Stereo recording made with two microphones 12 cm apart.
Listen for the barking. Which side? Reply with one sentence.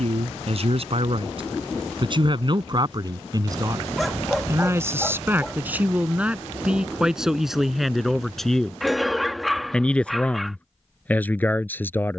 You can hear the barking in the centre.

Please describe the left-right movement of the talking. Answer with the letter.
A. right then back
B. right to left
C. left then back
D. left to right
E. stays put
B.